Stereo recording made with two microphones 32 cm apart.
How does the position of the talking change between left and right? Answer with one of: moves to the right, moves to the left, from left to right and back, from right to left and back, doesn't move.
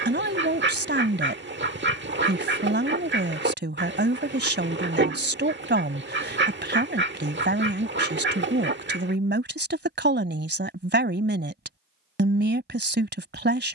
doesn't move.